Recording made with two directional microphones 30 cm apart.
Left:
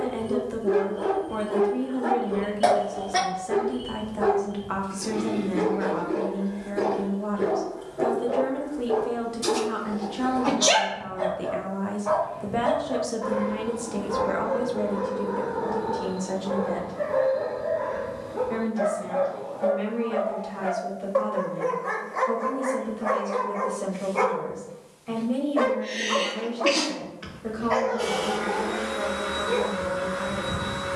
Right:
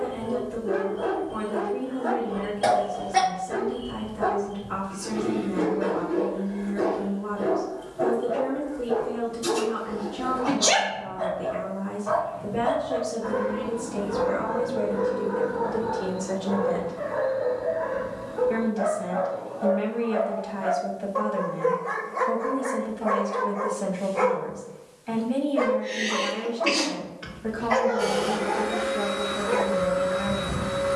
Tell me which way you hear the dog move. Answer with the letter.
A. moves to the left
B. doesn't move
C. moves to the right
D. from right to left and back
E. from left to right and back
C.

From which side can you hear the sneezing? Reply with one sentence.
In this clip you hear the sneezing on the left.